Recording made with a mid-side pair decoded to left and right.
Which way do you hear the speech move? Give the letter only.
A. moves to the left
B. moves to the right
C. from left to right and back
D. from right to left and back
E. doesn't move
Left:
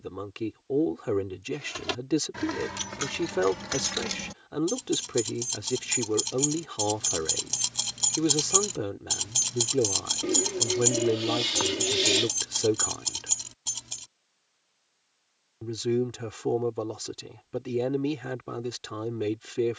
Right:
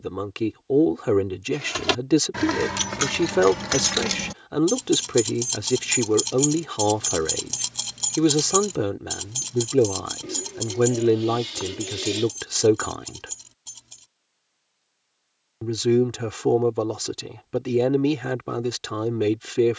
E.